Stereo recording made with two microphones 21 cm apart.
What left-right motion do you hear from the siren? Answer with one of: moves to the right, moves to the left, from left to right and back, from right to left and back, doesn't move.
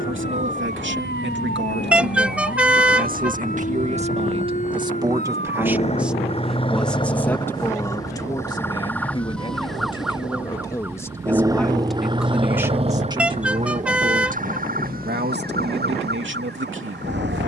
moves to the right.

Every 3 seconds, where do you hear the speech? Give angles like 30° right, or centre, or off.
60° right, 30° right, 10° left, 20° left, 20° right, 60° right.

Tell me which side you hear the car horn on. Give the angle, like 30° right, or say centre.
10° right.